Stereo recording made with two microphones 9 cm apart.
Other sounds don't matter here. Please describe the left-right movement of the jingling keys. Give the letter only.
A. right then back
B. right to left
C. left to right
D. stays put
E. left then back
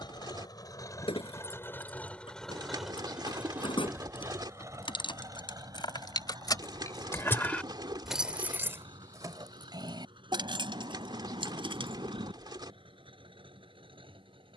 C.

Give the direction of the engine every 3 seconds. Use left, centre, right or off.
left, right, right, right, right.